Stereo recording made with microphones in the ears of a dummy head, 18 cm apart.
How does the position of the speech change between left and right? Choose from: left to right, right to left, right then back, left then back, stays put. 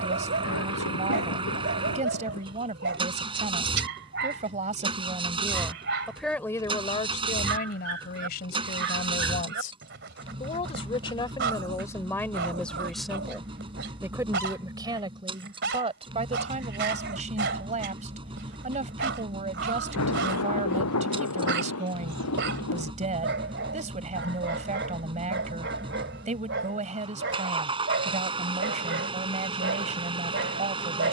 left then back.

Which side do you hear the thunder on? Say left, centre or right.
left.